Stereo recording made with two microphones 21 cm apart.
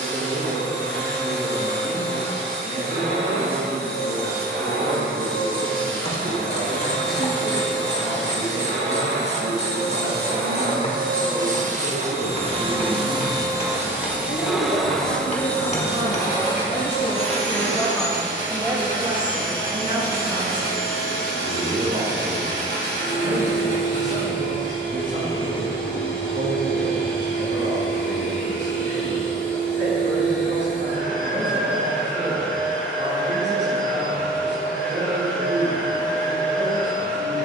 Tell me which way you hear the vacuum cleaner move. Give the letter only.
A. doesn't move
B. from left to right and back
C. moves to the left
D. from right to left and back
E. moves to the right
C.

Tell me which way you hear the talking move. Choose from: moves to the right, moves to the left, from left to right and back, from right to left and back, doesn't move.
from right to left and back.